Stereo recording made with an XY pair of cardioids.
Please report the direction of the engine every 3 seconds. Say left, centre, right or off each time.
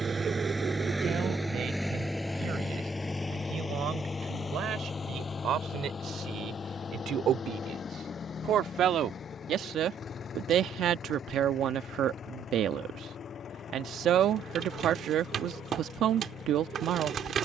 centre, left, left, left, left, left.